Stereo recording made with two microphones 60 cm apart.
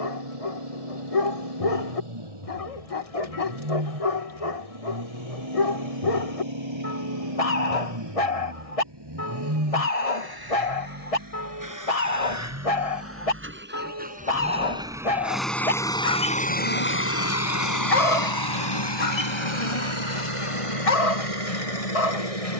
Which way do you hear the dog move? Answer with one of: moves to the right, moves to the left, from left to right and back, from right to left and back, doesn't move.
doesn't move.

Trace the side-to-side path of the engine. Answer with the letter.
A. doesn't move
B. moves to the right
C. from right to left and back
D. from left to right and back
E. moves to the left
E.